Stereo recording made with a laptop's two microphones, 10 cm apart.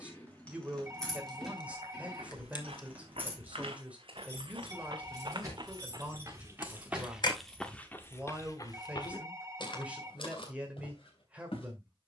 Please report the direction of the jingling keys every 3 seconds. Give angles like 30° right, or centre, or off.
centre, 30° right, 10° right, off.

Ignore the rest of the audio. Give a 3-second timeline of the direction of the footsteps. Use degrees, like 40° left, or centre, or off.
70° right, 60° right, centre, 60° left.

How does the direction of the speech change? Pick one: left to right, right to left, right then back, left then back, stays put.
stays put.